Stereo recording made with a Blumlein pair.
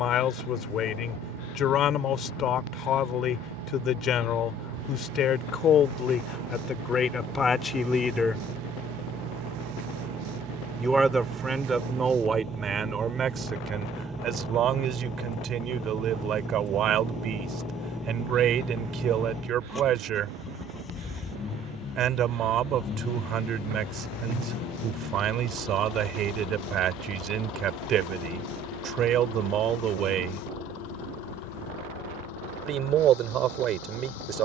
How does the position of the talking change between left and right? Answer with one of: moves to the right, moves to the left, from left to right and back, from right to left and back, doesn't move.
moves to the right.